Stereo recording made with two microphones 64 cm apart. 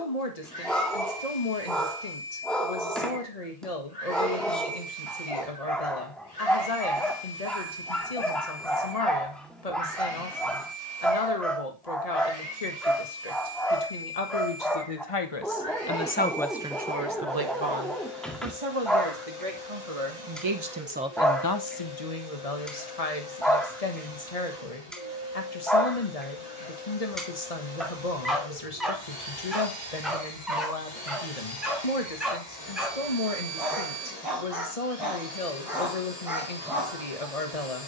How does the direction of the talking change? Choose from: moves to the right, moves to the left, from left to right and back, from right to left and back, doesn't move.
from left to right and back.